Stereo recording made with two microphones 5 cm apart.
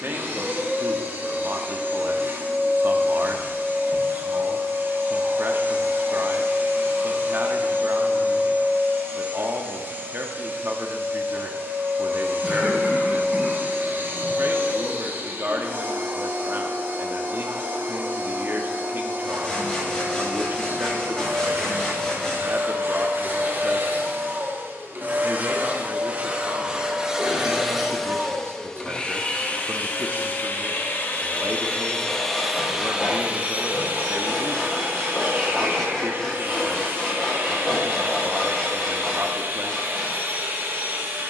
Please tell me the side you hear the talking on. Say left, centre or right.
right.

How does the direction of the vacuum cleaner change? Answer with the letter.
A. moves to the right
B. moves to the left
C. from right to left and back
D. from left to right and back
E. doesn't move
C.